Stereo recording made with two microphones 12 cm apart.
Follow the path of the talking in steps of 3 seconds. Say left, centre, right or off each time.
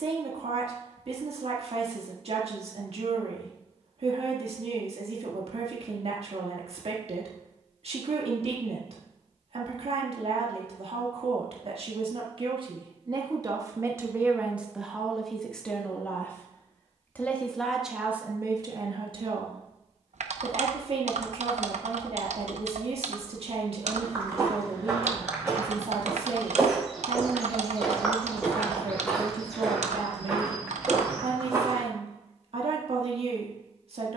right, right, right, right, right, centre, right, right, right, right, right, right.